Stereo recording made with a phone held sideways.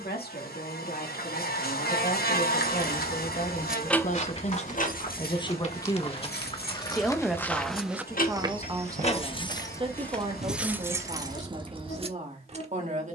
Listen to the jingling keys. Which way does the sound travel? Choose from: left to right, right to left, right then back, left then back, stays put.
left then back.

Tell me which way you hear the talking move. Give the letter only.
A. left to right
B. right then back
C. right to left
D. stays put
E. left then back
A.